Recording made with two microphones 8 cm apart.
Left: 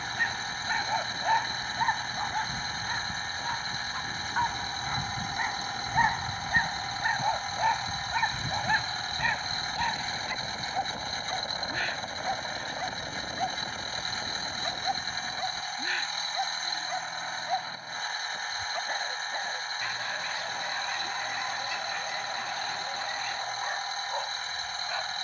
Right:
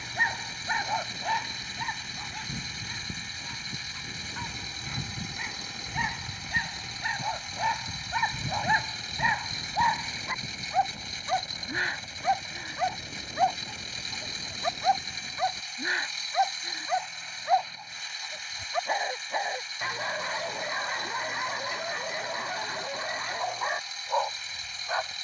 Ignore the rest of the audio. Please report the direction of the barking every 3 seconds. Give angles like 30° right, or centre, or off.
10° left, 50° left, 10° left, 30° right, 30° right, 30° right, 30° right, 30° right, 30° right.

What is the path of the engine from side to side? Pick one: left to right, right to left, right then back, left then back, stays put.
stays put.